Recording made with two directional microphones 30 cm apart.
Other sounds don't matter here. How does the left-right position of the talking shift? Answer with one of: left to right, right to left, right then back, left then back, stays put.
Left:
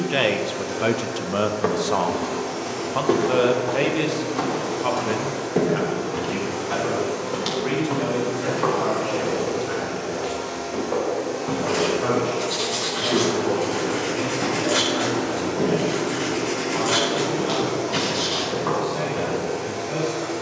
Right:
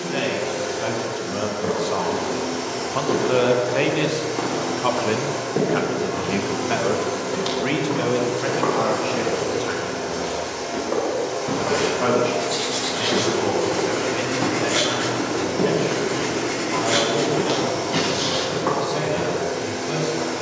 left to right.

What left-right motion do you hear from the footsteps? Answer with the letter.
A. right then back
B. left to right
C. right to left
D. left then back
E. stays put
B.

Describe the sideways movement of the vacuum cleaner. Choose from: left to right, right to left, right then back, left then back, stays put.
stays put.